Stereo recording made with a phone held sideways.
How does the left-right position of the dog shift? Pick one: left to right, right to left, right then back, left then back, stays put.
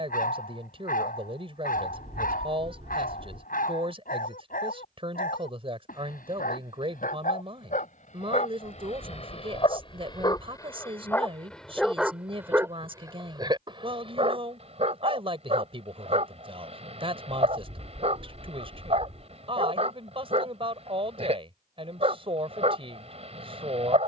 left to right.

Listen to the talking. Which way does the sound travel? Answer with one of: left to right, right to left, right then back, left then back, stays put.
stays put.